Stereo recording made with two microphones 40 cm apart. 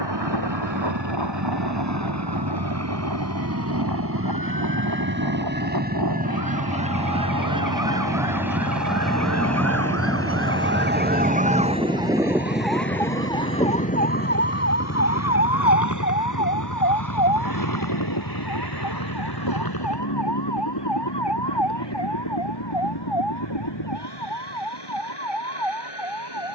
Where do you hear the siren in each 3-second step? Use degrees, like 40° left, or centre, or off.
70° right, 60° right, 50° right, 30° right, 10° left, 50° left, 60° left, 70° left, 80° left.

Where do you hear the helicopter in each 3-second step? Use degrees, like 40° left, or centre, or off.
40° right, 30° right, 10° right, 10° left, 30° left, 40° left, 50° left, 60° left, 60° left.